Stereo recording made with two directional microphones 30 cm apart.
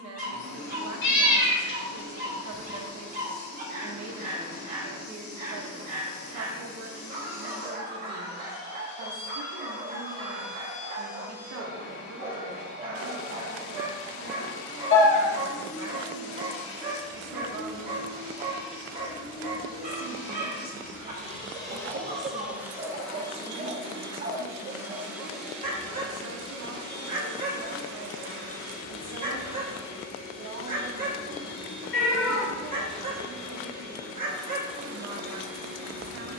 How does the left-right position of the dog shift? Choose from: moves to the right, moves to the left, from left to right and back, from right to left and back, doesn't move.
doesn't move.